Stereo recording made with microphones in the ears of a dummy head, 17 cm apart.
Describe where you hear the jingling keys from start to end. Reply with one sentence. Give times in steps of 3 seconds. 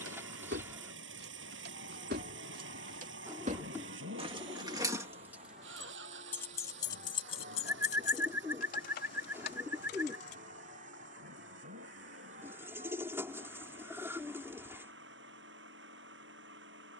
In this clip you hear the jingling keys on the right from 0 s, on the left from 6 s and not at all from 12 s.